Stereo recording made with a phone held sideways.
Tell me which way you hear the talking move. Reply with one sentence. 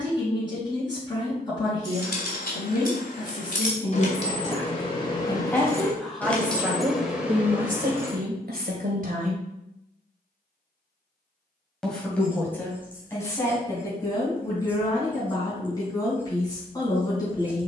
In this clip you hear the talking move from left to right and back again.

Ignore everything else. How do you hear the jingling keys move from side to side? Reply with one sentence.
In this clip you hear the jingling keys travel towards the right.